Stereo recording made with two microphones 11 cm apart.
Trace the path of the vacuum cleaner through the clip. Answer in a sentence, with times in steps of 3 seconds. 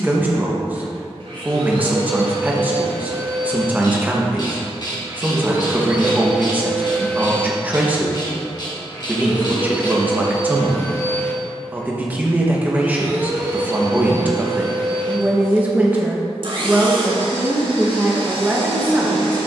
In this clip you hear the vacuum cleaner on the right from 0 s, in the centre from 6 s, on the left from 9 s and on the right from 12 s.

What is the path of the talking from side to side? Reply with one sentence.
In this clip you hear the talking stay in one place.